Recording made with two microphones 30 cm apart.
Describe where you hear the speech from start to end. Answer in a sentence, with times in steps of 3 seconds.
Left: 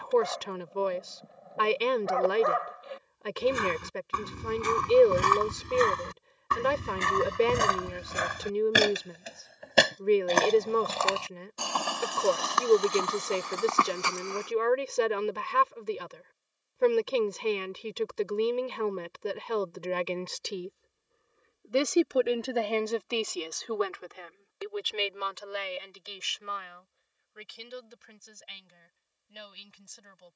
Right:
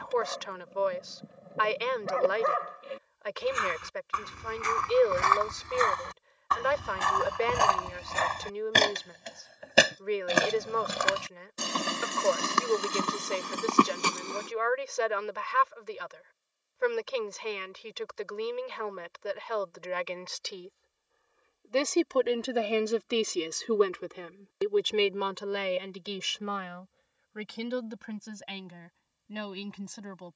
You can hear the speech on the left from 0 s, in the centre from 21 s and on the right from 24 s.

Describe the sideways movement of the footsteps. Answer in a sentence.
You can hear the footsteps move from left to right.